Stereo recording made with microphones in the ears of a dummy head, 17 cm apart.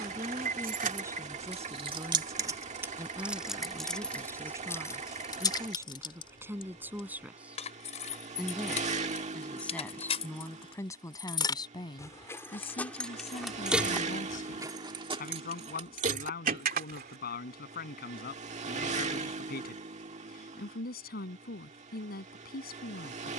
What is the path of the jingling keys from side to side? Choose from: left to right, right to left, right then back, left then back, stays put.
left then back.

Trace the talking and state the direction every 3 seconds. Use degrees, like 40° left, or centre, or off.
20° right, 20° right, 10° right, 10° left, 40° left, 50° left, 60° left, 60° left.